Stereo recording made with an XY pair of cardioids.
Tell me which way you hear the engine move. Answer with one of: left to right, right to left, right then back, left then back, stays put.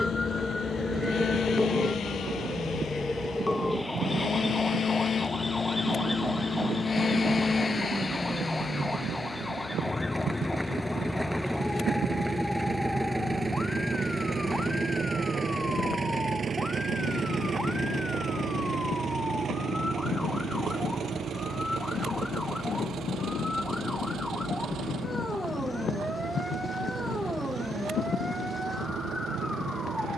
left to right.